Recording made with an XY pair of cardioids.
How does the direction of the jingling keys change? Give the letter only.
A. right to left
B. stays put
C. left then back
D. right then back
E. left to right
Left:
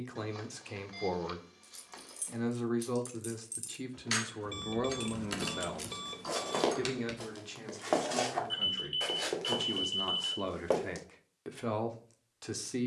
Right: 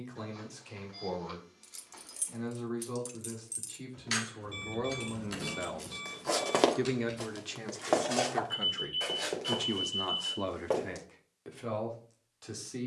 A.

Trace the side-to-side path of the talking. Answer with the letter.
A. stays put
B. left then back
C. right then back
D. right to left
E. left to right
C.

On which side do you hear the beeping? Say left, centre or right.
left.